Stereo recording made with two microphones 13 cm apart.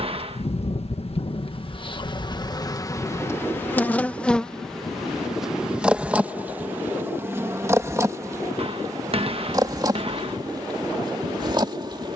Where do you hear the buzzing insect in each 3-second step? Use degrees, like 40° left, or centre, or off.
40° left, 10° left, 20° right, 30° right.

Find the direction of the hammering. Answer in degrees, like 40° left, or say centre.
50° right.